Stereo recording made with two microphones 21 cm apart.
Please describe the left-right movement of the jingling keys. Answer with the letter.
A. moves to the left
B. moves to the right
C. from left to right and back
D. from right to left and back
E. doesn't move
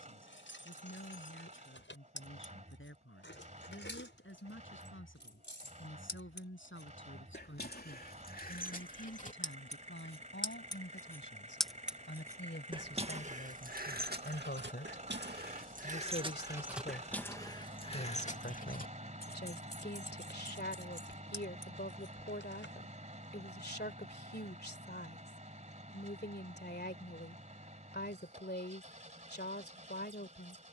C.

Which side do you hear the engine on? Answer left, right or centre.
right.